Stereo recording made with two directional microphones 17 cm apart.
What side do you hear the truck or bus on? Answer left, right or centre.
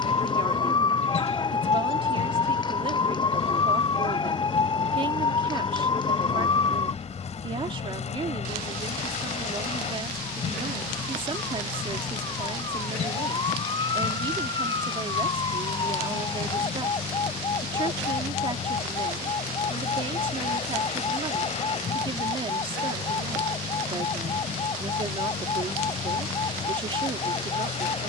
left.